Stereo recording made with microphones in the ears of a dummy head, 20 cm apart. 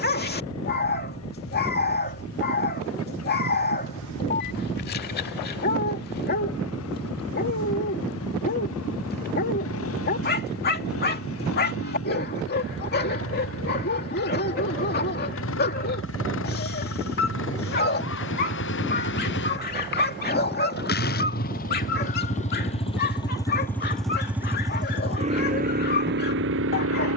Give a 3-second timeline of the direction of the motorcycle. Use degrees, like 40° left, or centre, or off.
70° left, 70° left, 70° left, 70° left, 60° left, 60° left, 50° left, 30° left, 30° right.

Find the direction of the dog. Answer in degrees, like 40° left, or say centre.
50° left.